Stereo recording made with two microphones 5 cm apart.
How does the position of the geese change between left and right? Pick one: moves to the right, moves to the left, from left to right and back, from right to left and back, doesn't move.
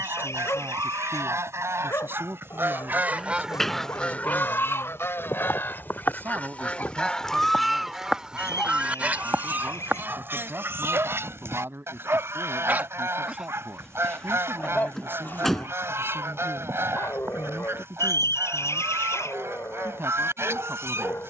from right to left and back.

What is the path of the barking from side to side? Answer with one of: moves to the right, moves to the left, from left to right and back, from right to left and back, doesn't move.
from left to right and back.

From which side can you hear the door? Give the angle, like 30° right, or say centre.
10° left.